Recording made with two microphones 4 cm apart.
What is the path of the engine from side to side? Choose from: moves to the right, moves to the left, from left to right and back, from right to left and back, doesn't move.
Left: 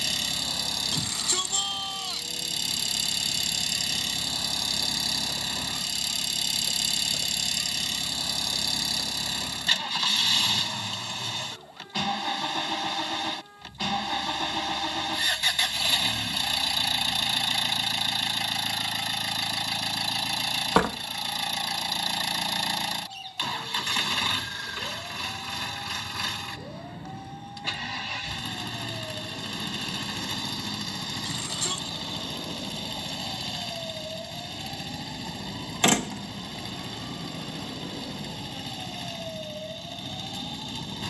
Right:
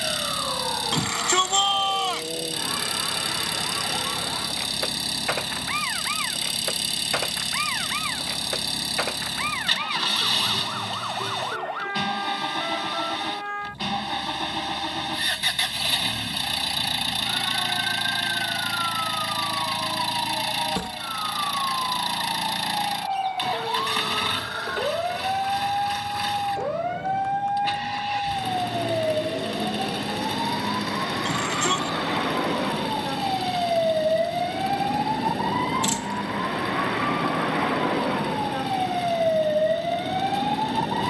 doesn't move.